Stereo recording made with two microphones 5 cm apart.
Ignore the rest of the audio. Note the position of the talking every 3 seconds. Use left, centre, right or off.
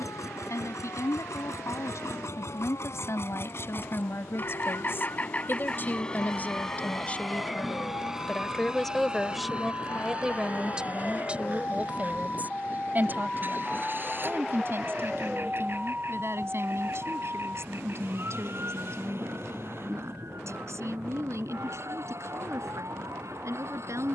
left, left, left, centre, right, right, right, right.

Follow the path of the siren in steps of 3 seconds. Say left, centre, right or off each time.
left, left, left, left, centre, right, right, right.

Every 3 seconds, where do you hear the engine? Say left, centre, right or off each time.
left, left, centre, right, right, right, right, right.